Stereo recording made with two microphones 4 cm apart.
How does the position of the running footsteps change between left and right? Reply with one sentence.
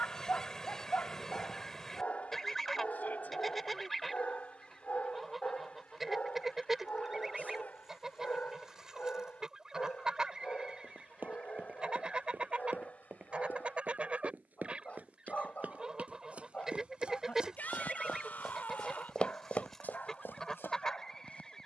In this clip you hear the running footsteps go from the right side to the left.